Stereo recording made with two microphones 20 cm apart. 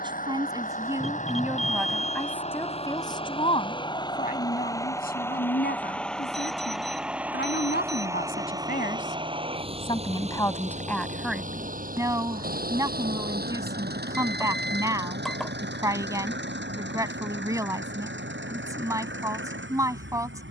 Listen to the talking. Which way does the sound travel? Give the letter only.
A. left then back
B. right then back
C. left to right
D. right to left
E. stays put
A.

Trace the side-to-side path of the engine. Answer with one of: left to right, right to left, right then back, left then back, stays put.
left to right.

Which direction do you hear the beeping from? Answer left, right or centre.
centre.